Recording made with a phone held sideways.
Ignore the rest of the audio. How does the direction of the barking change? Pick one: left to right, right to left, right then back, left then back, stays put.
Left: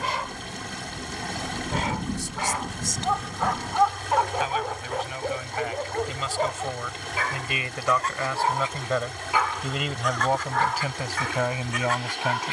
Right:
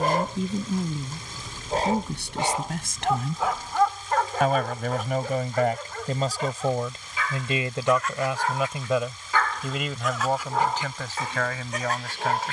left then back.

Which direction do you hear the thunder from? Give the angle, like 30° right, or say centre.
50° left.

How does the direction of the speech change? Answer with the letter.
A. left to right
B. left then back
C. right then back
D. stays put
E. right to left
E.